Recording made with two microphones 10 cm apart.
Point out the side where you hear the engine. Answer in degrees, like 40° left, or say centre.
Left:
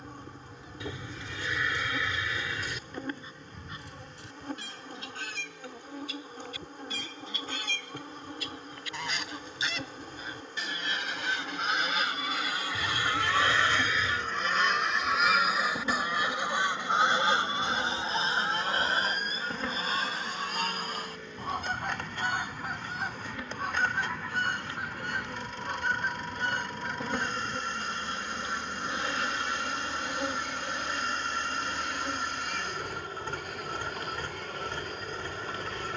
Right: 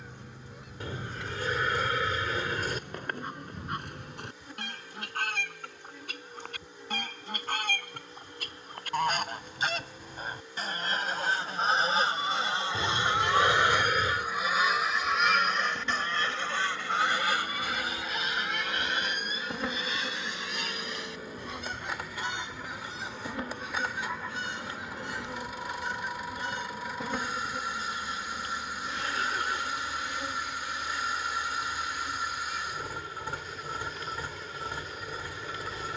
10° right.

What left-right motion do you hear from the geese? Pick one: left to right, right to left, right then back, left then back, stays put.
right to left.